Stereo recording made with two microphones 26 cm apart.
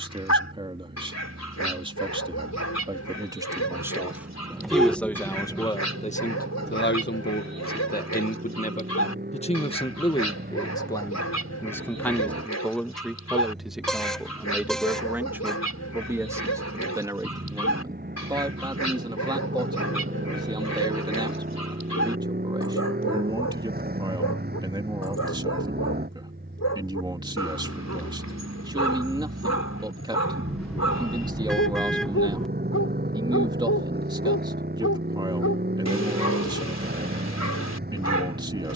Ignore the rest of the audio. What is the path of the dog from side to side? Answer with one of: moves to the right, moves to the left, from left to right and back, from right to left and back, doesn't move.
doesn't move.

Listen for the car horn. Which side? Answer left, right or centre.
centre.